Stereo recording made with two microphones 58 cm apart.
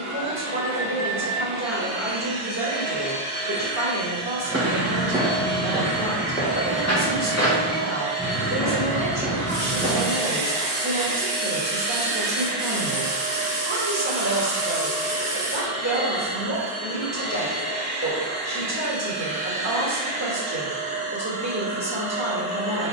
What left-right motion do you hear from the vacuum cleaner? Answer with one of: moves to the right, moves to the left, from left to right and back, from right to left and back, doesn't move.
from right to left and back.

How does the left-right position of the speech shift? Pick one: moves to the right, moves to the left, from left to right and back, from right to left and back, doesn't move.
doesn't move.